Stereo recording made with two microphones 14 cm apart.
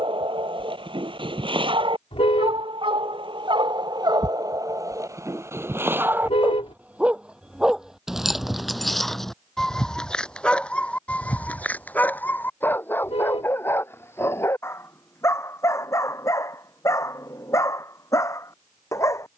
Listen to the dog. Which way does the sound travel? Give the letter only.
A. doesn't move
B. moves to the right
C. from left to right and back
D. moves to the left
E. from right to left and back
D.